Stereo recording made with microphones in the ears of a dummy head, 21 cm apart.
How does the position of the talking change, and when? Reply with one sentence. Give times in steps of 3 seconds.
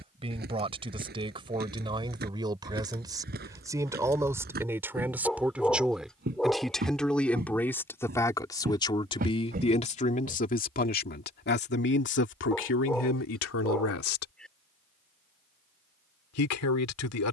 You can hear the talking on the right from 0 s, in the centre from 3 s and on the left from 9 s.